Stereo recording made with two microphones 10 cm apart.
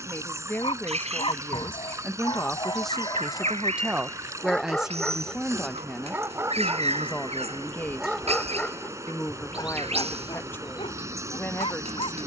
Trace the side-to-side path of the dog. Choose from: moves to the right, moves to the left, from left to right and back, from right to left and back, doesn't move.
from left to right and back.